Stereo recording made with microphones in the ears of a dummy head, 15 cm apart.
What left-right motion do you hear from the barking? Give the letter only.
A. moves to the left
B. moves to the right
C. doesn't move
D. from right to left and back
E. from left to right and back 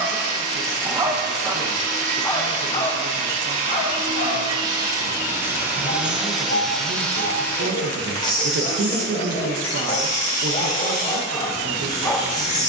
D.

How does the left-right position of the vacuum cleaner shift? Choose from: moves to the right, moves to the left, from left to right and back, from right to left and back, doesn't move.
moves to the left.